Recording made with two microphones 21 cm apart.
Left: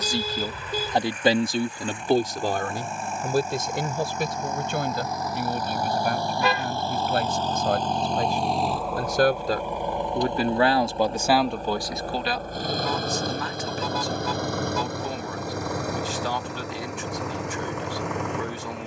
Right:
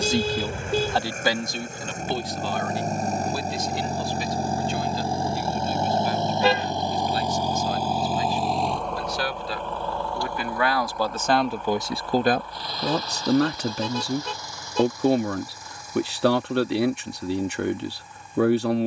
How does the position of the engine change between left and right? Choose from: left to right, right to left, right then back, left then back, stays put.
right to left.